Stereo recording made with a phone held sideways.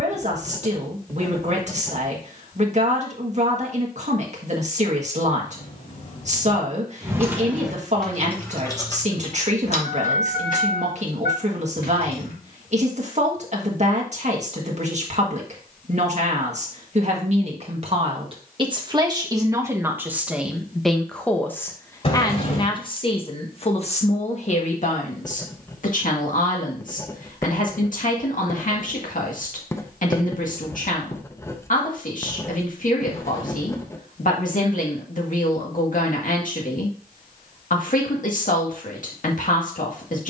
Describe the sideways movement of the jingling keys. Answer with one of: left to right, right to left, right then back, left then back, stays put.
right to left.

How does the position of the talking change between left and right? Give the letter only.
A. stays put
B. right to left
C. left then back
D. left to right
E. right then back
B.